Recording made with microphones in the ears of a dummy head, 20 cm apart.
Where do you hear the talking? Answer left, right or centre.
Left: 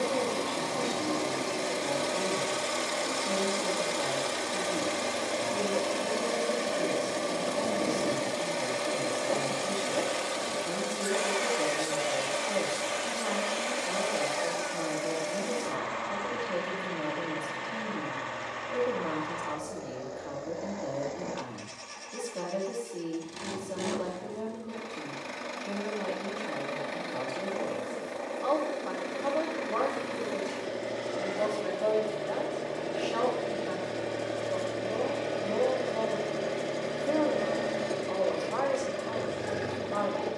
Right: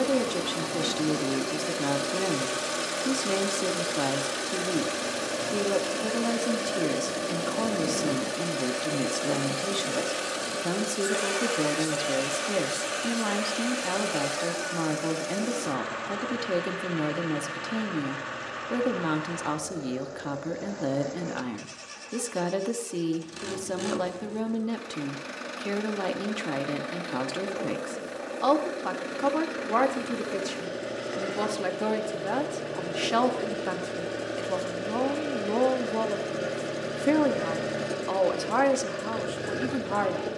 right.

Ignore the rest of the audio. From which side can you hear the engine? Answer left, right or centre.
centre.